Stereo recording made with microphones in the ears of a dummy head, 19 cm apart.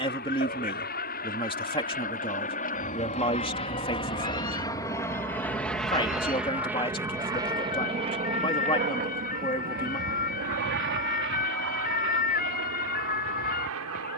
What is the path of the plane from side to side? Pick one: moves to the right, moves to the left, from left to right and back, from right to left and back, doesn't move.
moves to the right.